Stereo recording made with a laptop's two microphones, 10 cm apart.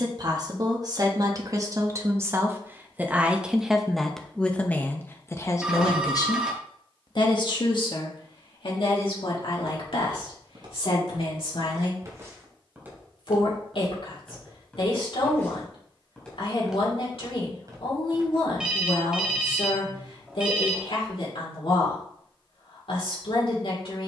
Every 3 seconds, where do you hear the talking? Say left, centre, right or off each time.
right, centre, left, left, left, left, left, left.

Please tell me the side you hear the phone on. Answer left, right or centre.
centre.